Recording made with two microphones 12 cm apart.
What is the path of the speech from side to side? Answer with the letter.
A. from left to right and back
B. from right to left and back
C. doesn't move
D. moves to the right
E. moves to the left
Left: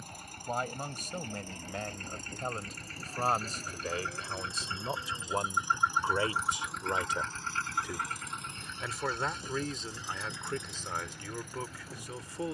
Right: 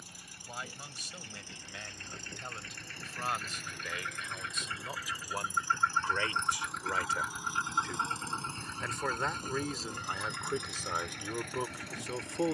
D.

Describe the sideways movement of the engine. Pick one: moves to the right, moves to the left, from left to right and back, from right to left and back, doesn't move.
moves to the right.